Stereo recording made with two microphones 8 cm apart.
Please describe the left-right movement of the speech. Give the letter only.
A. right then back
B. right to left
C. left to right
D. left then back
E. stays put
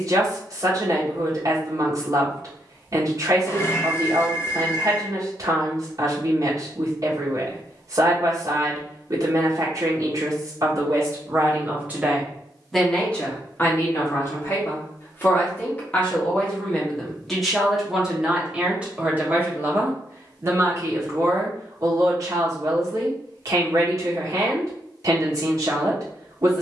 D.